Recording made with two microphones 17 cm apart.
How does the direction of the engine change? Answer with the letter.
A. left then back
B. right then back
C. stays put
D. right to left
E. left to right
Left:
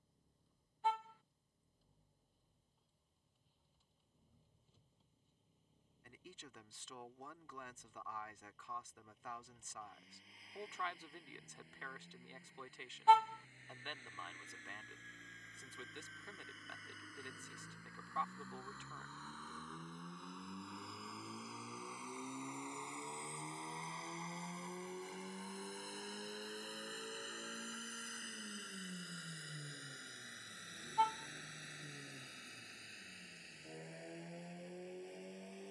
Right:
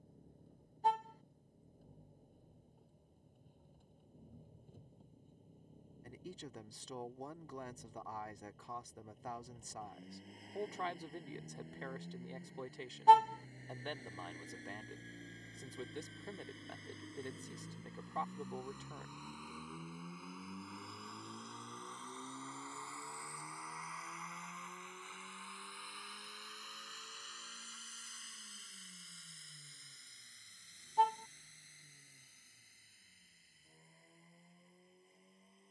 D.